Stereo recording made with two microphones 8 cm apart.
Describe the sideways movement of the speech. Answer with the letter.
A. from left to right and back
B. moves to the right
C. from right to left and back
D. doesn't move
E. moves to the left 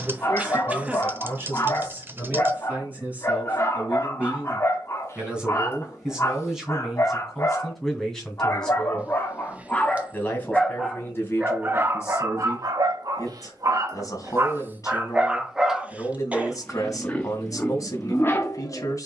E.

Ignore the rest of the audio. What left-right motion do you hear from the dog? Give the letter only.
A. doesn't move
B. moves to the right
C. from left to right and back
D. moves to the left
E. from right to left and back
C.